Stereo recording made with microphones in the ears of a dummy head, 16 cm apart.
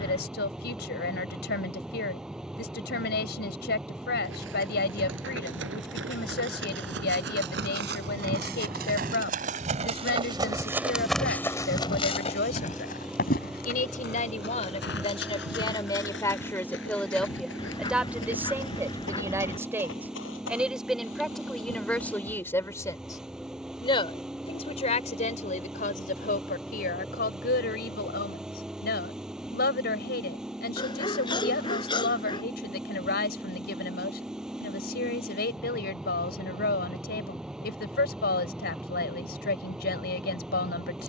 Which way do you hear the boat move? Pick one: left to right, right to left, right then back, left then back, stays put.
stays put.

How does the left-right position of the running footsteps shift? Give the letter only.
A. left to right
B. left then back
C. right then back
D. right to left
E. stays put
D.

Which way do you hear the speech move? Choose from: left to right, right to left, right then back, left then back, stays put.
right then back.